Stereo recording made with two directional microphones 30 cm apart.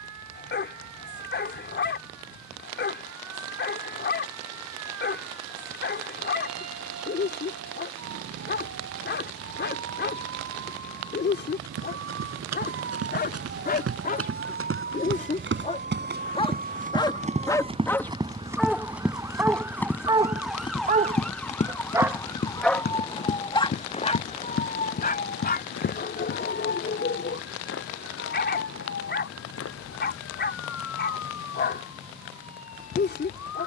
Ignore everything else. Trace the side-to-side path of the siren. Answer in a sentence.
You can hear the siren go from the right side to the left.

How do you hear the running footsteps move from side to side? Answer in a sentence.
You can hear the running footsteps travel towards the left.